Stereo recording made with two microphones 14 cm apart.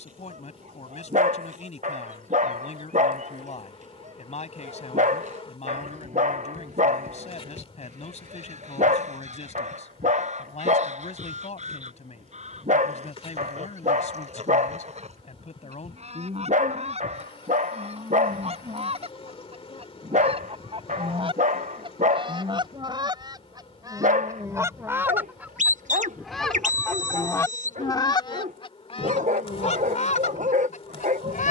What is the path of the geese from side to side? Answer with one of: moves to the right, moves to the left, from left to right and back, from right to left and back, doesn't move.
moves to the left.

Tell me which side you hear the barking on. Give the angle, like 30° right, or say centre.
60° right.